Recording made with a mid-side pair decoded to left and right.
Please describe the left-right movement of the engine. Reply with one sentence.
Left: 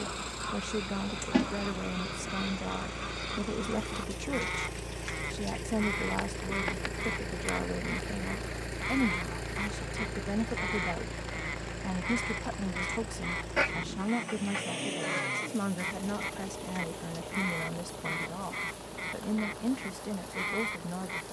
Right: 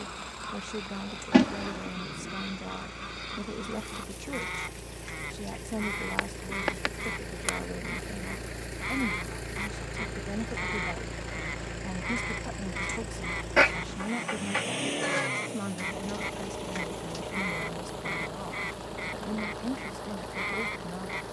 You can hear the engine travel towards the right.